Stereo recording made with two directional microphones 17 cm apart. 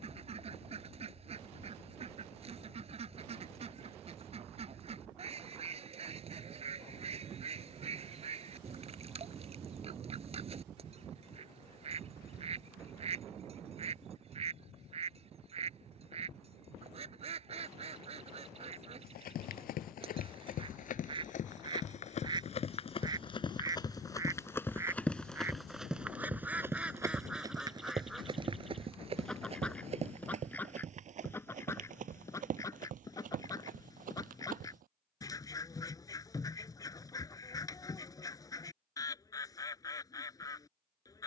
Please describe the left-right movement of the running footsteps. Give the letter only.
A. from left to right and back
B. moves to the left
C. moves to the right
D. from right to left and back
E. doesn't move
C.